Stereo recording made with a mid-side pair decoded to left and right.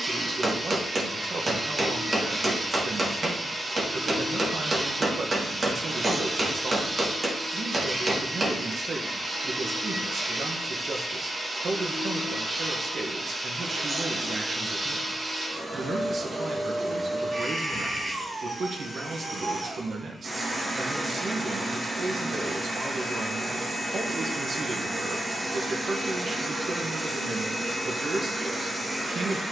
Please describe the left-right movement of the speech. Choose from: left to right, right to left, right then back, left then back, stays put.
stays put.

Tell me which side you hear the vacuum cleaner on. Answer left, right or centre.
right.